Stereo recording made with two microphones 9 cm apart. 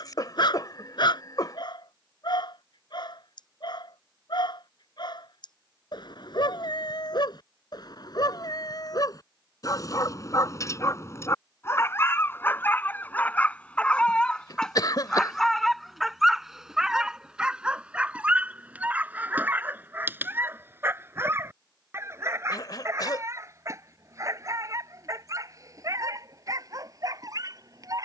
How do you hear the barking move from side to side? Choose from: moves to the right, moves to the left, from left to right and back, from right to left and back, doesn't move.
moves to the right.